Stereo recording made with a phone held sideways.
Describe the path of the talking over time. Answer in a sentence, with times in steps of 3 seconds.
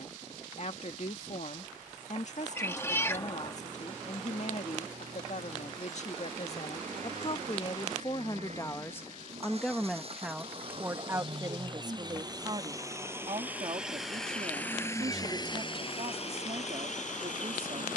You can hear the talking on the left from 0 s, in the centre from 9 s and on the right from 12 s.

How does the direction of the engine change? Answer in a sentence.
You can hear the engine move from right to left.